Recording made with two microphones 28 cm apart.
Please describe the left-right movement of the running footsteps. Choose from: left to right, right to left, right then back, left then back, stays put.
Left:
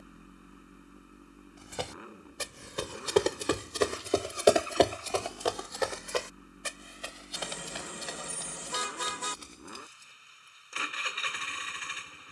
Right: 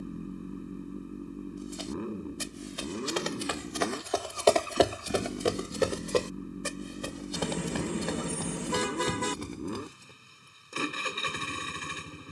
left to right.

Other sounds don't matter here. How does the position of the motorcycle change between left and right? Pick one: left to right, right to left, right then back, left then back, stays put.
stays put.